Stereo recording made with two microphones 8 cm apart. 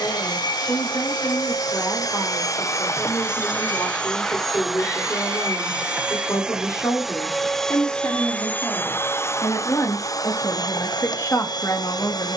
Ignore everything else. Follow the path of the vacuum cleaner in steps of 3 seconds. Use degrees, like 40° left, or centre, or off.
60° left, 10° left, 10° left, 60° left.